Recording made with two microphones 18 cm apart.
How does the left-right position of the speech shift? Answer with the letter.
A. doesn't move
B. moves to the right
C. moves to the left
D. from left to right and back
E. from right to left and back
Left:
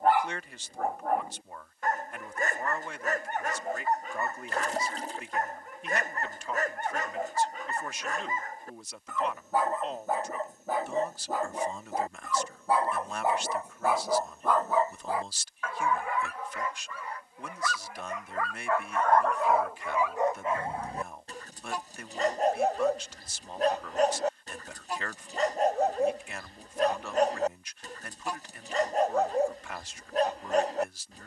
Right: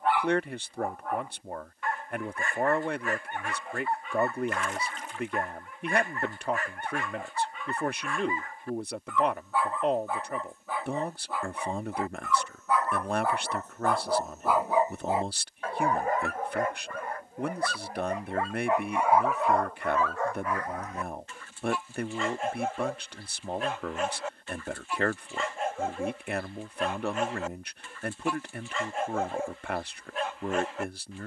A.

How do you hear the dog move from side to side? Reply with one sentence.
You can hear the dog go right and come back.